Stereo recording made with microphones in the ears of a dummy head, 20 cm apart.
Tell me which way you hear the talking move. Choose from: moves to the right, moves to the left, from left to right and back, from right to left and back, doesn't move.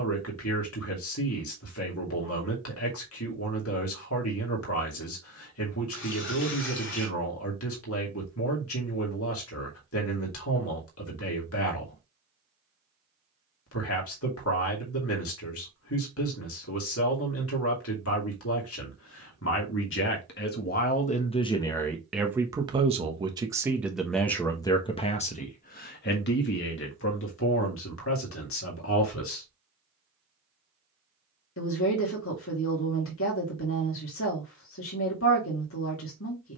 from left to right and back.